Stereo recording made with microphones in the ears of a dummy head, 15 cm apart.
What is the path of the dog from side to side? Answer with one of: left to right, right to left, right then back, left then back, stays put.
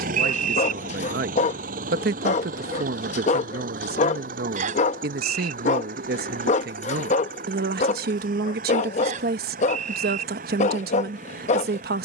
stays put.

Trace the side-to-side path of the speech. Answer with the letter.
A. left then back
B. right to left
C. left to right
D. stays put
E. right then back
D.